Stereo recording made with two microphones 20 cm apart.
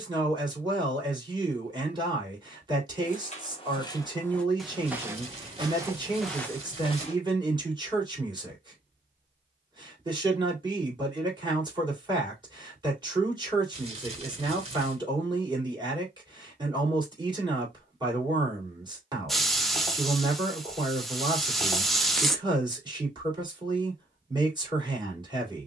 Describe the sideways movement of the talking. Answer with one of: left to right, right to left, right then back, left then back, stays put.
stays put.